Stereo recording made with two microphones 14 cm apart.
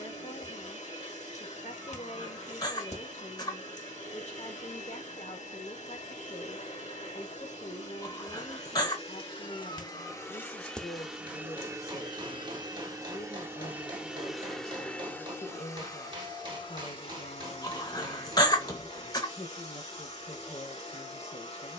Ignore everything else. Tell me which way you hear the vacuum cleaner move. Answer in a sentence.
You can hear the vacuum cleaner move from left to right and back again.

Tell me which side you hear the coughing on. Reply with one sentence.
In this clip you hear the coughing on the left.